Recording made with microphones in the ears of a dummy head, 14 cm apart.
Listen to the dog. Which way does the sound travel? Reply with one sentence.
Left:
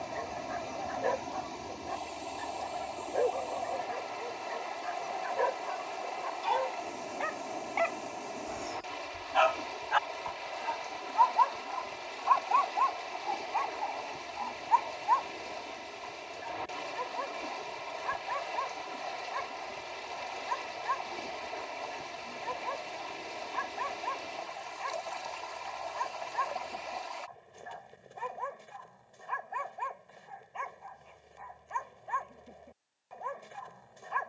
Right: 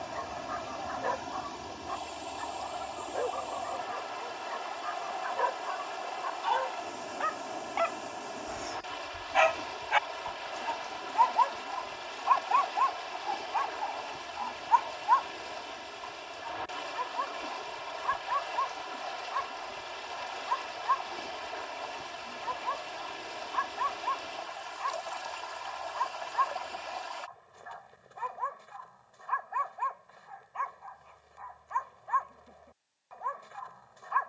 In this clip you hear the dog move from left to right and back again.